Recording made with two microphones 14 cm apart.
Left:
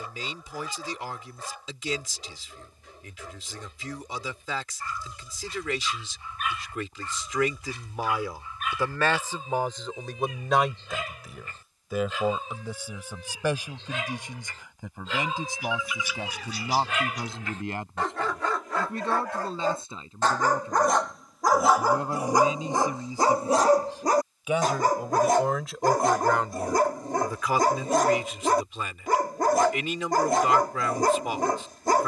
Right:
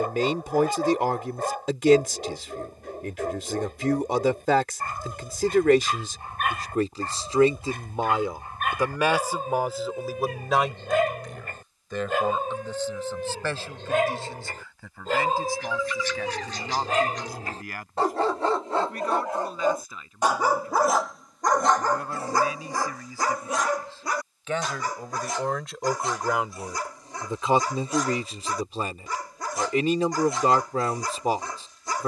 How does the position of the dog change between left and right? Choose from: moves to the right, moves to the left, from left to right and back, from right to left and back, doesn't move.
moves to the left.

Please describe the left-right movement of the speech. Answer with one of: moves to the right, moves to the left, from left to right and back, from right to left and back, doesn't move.
from right to left and back.